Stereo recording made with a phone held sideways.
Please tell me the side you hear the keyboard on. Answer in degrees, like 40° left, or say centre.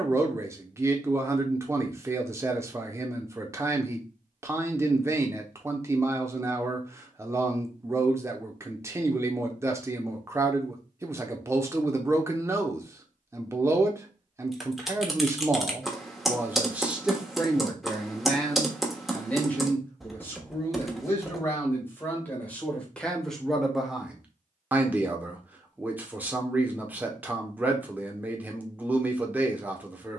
centre.